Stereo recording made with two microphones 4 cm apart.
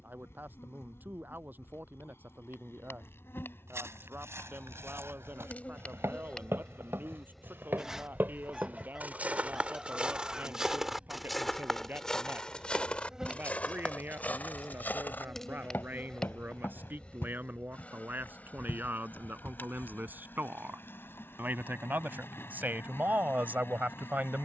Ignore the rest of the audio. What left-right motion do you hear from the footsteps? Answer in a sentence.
In this clip you hear the footsteps travel towards the left.